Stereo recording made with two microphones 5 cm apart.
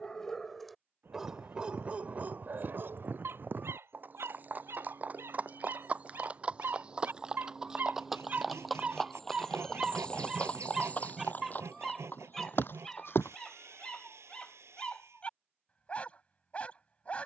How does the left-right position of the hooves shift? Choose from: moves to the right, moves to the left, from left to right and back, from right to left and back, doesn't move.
moves to the left.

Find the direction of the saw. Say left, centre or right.
right.